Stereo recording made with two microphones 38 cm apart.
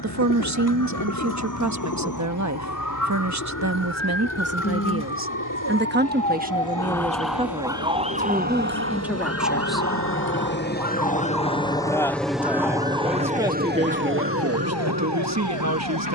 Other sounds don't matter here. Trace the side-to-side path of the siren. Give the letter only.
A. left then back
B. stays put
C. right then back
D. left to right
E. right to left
D.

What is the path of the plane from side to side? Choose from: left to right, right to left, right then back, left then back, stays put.
left to right.